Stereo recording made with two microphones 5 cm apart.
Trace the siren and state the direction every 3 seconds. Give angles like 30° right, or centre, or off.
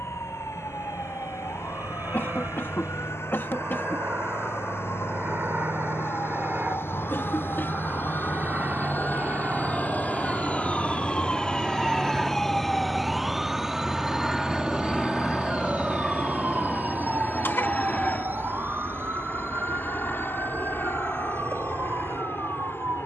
70° left, 70° left, 50° left, 30° left, 10° right, 40° right, 50° right, 60° right.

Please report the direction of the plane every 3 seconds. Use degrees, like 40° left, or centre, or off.
60° right, 50° right, 40° right, 20° right, centre, 20° left, 40° left, 50° left.